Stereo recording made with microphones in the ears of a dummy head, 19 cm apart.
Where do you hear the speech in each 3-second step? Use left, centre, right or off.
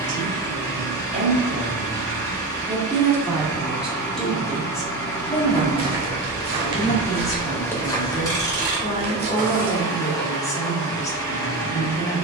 right, centre, left, left.